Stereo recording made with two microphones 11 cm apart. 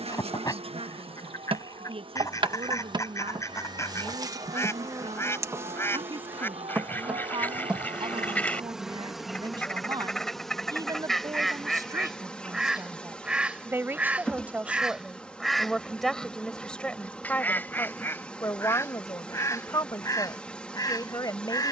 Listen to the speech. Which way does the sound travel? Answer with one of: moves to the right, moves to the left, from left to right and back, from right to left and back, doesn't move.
moves to the left.